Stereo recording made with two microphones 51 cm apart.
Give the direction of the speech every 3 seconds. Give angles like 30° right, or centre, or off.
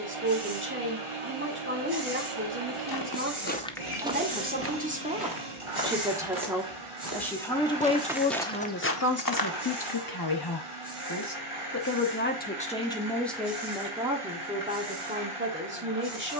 20° right, 20° right, 10° left, 40° left, centre, 20° right.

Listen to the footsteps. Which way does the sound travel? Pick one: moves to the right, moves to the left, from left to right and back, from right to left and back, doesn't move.
from left to right and back.